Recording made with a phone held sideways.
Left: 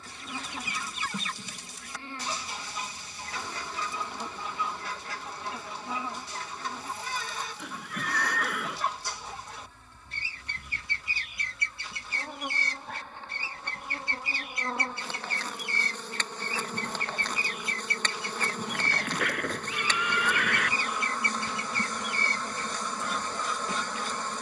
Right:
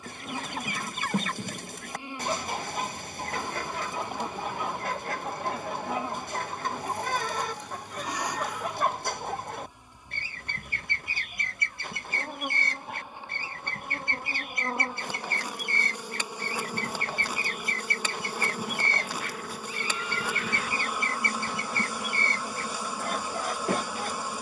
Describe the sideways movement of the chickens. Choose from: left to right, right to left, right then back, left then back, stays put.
stays put.